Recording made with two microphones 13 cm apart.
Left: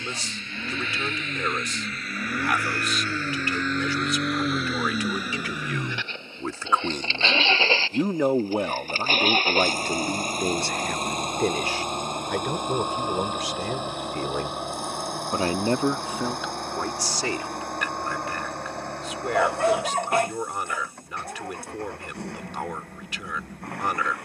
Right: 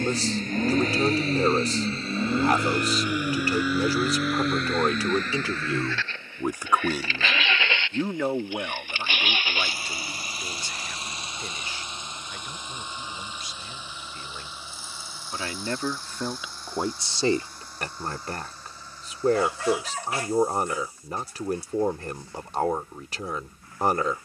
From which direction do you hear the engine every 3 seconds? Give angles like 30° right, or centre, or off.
30° right, centre, 30° left, 50° left, 60° left, 60° left, 70° left, 70° left.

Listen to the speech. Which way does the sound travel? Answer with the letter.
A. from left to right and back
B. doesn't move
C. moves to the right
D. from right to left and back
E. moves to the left
D.